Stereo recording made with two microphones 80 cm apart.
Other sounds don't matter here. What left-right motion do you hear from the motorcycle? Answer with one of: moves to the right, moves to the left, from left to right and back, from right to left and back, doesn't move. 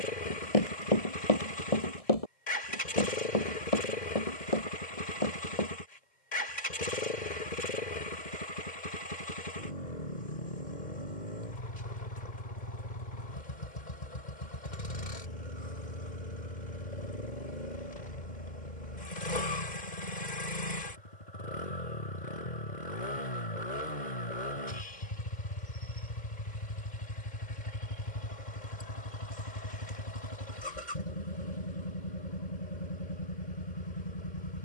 doesn't move.